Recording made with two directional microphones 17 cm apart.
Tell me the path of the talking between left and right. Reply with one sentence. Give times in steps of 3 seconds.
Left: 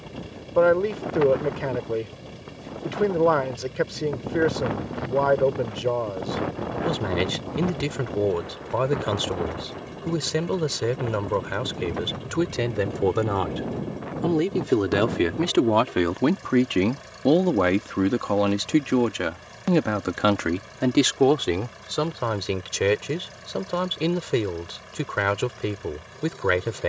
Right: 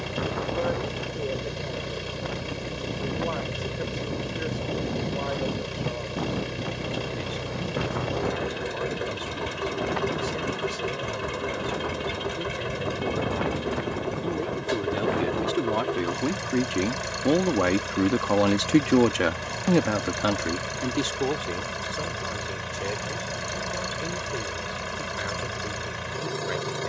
In this clip you hear the talking on the left from 0 s, in the centre from 18 s and on the left from 21 s.